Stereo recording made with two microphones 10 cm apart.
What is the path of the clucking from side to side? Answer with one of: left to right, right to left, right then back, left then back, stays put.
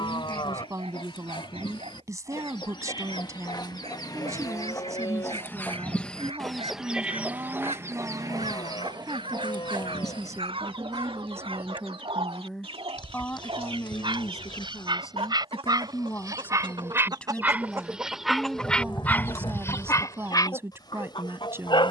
right then back.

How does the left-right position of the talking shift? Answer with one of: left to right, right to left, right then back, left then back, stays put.
left then back.